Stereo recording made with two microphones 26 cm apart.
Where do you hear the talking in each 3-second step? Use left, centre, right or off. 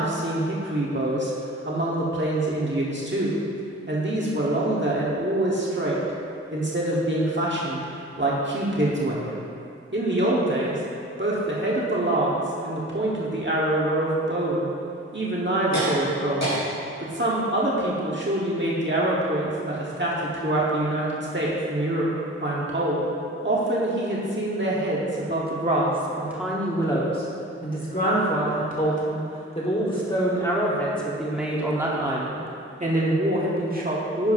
right, right, right, right, right, right, right, right, right, left, centre, right.